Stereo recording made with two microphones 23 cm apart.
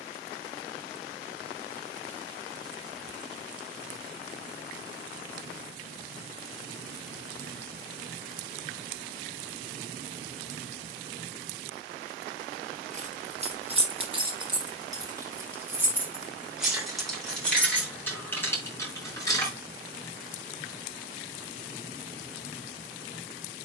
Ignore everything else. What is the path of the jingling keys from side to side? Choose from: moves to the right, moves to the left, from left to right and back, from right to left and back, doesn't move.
moves to the left.